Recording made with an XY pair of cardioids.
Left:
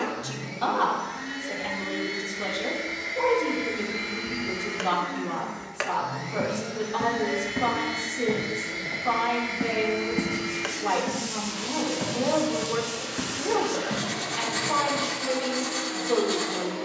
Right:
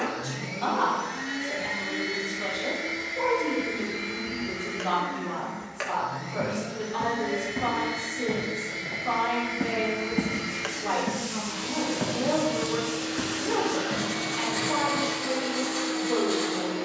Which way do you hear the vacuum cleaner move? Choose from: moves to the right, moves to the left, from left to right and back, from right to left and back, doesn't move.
from right to left and back.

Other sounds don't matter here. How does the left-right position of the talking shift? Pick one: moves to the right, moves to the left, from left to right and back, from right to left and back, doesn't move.
doesn't move.